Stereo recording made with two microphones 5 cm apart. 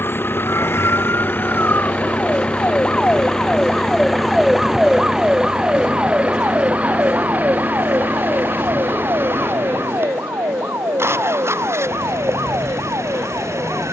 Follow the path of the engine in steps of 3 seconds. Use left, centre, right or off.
left, centre, right, right, right.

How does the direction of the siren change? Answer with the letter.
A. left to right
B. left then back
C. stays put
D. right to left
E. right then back
A.